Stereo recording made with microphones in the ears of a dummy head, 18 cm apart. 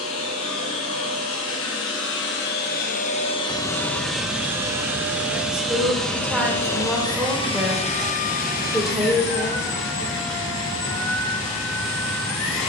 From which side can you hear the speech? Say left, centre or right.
centre.